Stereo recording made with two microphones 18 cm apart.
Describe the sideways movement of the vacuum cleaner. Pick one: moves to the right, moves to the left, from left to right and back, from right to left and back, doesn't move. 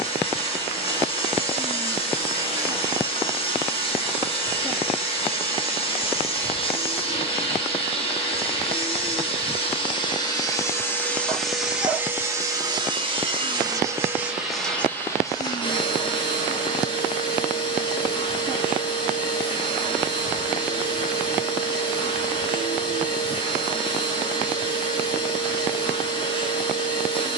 from left to right and back.